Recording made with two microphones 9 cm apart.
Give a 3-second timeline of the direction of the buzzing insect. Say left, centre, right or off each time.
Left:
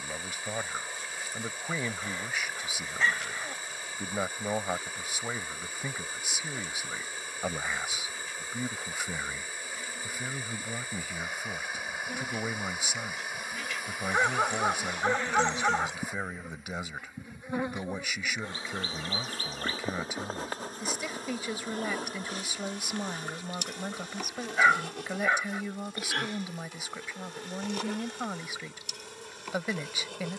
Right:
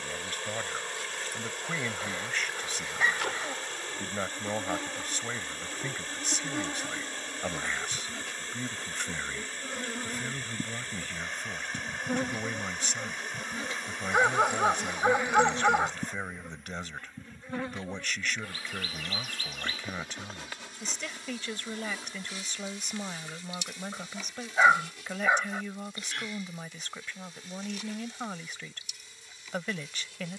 right, right, right, right, right, centre, left, left, left, left.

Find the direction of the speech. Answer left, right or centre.
centre.